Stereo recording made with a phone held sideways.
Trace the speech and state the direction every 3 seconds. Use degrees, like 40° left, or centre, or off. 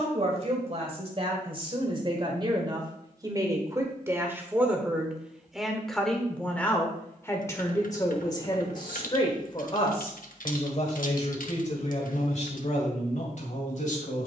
40° right, 10° right, 20° left, 50° left, 60° left.